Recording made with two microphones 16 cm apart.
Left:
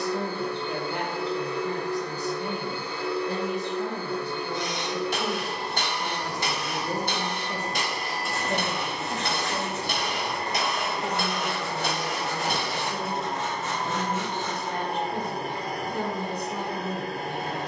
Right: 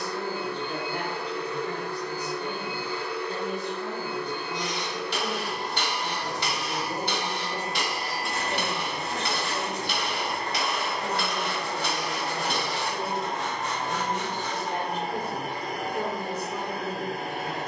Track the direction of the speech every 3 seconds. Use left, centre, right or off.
left, left, left, left, centre, centre.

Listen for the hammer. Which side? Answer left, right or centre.
left.